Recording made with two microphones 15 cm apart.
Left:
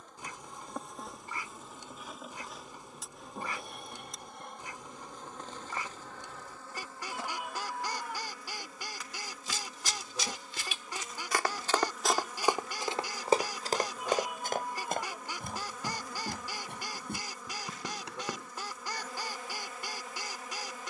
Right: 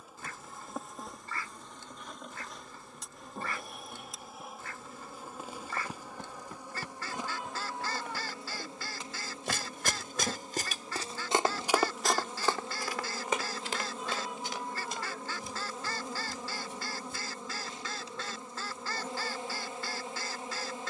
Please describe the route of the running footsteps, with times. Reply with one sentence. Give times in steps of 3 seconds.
In this clip you hear the running footsteps not at all from 0 s, on the right from 6 s and on the left from 12 s.